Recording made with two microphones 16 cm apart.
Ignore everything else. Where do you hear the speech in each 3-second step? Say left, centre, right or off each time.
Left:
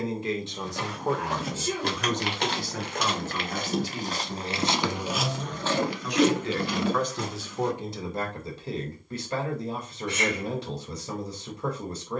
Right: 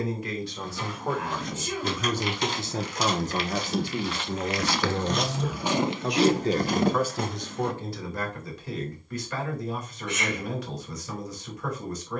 centre, right, centre, left.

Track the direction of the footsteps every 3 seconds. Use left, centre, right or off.
left, left, right, off.